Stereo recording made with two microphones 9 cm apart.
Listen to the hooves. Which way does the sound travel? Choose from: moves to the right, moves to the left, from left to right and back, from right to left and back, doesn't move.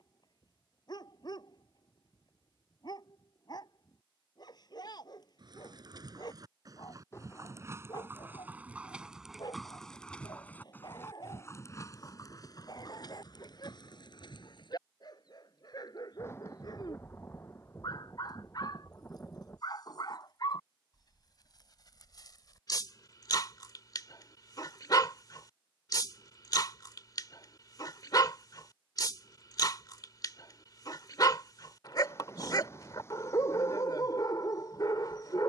moves to the left.